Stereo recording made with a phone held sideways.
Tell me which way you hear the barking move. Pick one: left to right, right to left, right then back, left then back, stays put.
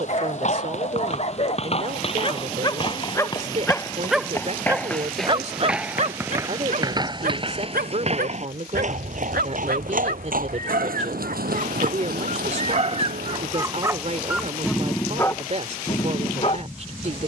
right then back.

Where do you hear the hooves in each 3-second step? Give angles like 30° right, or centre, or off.
40° left, 10° left, 30° right, 60° right, 70° right, off.